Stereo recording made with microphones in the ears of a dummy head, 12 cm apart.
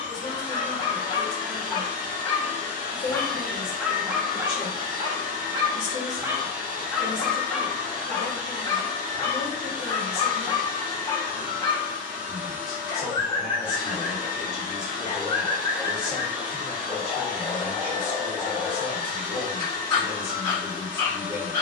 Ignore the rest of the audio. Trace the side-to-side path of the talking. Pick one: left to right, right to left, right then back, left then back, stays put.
stays put.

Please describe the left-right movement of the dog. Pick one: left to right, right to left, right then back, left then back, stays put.
right then back.